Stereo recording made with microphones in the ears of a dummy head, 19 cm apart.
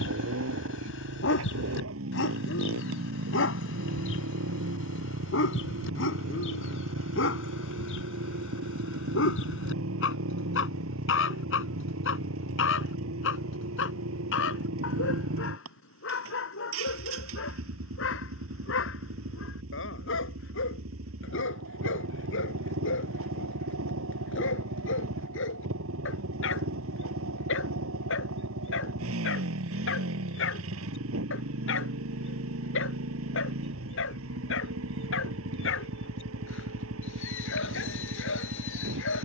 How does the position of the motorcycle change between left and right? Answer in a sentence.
You can hear the motorcycle stay put.